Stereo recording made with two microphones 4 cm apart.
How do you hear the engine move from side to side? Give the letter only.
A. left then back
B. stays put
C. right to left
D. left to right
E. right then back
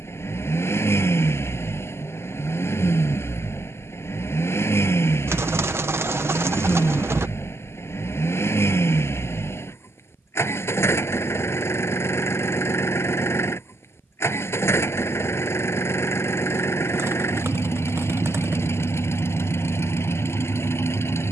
B.